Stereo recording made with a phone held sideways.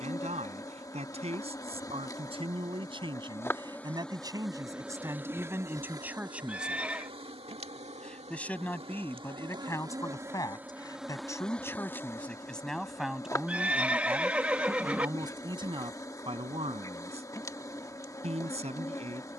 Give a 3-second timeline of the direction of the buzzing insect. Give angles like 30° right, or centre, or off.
20° left, centre, 30° right, 10° right, 20° left, 20° left, 20° left.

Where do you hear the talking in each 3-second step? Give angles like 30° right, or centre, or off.
40° right, 20° right, centre, 20° left, centre, 30° right, 40° right.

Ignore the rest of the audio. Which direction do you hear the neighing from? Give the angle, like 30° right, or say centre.
10° right.